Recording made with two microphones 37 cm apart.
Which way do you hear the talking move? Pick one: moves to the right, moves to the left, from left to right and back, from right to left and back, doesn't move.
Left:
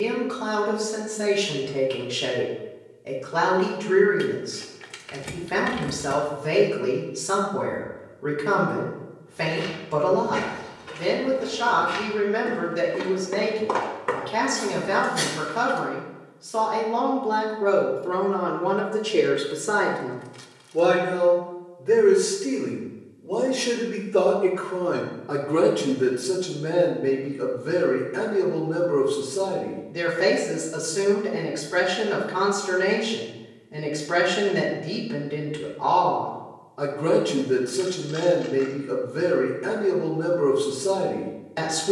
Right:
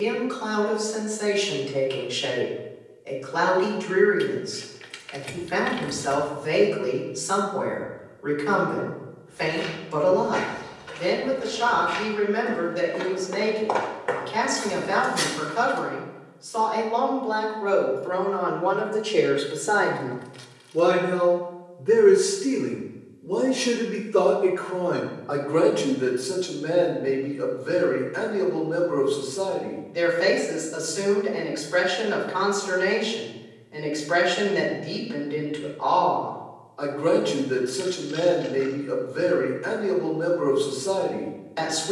from left to right and back.